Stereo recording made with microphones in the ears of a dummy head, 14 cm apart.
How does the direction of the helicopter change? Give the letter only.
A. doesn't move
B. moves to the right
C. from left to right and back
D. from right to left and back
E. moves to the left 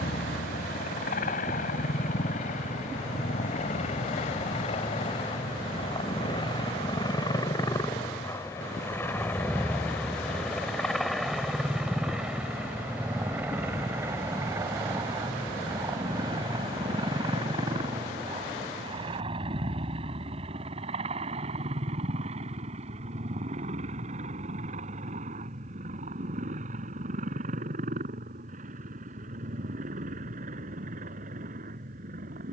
B.